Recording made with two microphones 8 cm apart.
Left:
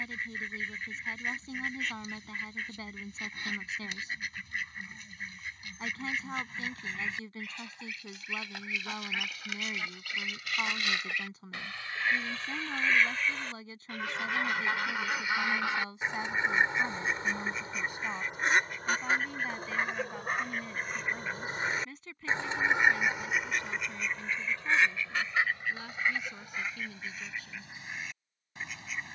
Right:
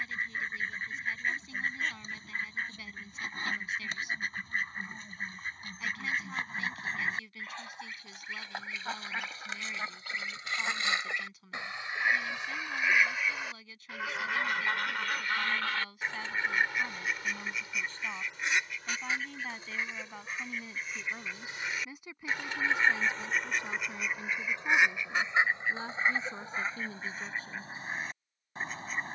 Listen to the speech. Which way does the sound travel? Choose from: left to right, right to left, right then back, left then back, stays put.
left to right.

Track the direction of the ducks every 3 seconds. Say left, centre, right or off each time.
right, right, right, right, centre, left, left, left, right, right.